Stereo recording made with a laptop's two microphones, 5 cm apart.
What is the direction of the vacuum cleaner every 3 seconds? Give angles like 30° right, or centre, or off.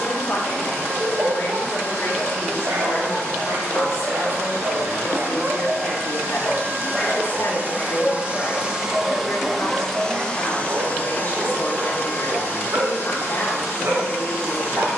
70° right, 60° right, 40° right, 20° left, 60° left.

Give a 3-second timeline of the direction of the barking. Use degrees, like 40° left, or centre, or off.
70° right, 40° right, 10° left, 40° right, 70° right.